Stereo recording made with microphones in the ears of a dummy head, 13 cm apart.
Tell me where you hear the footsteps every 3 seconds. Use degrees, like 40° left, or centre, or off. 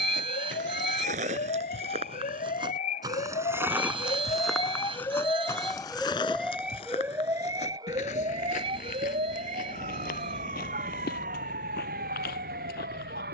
50° right, centre, 40° left, 60° left, 70° left.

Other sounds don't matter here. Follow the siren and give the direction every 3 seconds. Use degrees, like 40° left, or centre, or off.
60° left, 30° left, 20° right, 50° right, 60° right.